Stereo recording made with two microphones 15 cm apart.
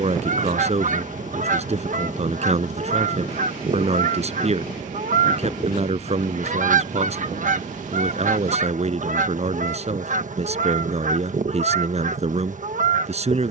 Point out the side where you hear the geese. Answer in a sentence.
In this clip you hear the geese on the right.